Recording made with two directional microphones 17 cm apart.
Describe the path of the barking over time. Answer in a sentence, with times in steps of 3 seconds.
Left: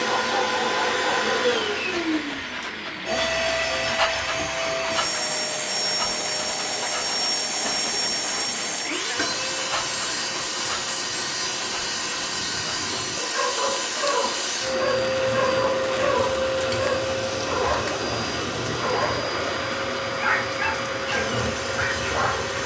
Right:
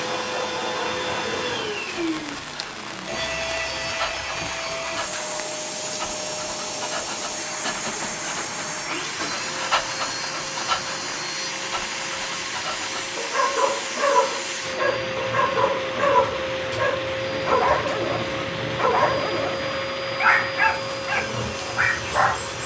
In this clip you hear the barking on the left from 0 s, in the centre from 6 s and on the right from 9 s.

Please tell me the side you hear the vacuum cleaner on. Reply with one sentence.
You can hear the vacuum cleaner on the left.